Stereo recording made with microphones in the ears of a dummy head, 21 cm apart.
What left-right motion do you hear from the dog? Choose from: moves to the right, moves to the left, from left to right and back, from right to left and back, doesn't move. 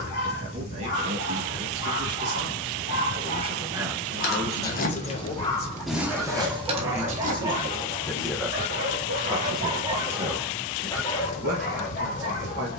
from left to right and back.